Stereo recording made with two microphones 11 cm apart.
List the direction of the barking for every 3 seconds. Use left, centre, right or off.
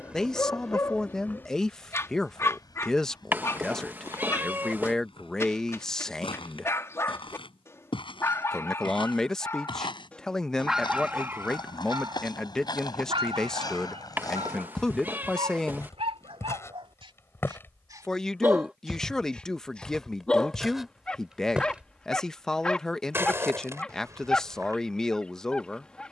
left, left, left, centre, right, right, centre, centre, centre.